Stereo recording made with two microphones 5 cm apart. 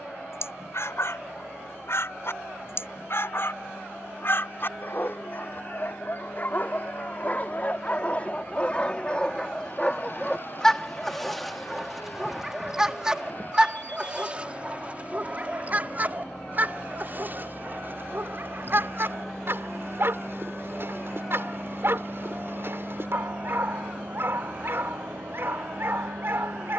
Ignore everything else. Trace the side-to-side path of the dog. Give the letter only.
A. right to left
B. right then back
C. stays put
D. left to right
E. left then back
D.